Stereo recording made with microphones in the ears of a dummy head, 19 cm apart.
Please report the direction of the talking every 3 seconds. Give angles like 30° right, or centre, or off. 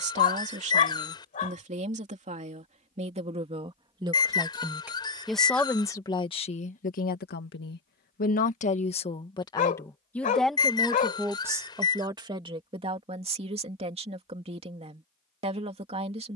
30° right, 10° right, 40° left, centre, 30° right, 30° right.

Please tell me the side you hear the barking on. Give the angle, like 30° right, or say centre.
40° left.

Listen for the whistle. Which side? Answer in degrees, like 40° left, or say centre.
20° left.